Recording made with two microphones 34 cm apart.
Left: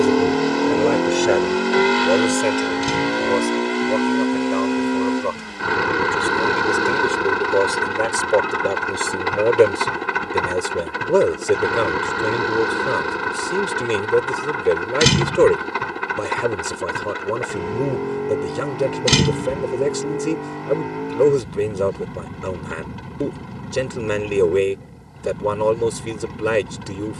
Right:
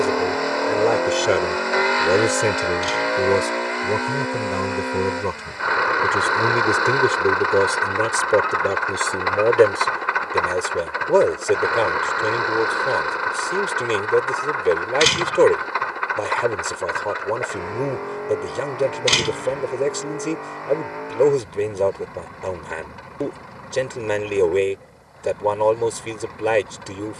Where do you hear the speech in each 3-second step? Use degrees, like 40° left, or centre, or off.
10° right, 50° right, 20° right, 10° left, 20° left, 20° left, 20° left, 20° left, 20° left.